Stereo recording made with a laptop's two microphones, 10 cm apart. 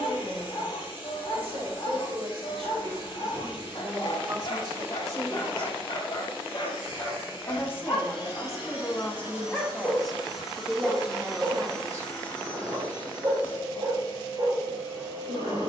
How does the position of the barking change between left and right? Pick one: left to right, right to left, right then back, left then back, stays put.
left to right.